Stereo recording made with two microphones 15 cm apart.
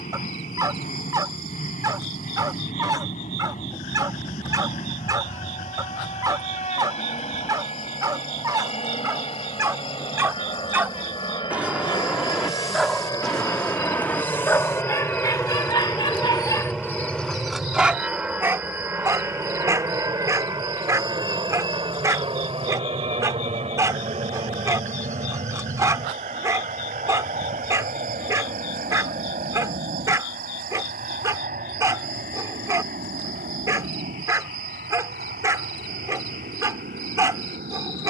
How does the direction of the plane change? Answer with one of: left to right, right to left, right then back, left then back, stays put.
left to right.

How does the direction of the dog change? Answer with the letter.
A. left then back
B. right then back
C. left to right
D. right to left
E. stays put
A.